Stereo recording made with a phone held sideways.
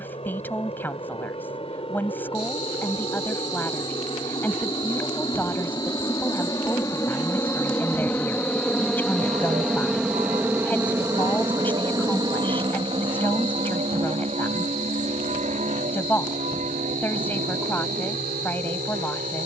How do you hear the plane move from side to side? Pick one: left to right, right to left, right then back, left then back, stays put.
left to right.